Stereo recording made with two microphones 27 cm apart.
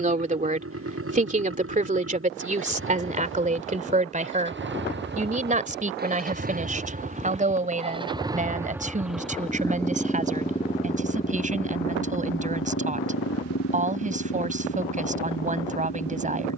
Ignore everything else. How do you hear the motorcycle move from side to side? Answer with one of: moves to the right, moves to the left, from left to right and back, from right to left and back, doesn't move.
moves to the left.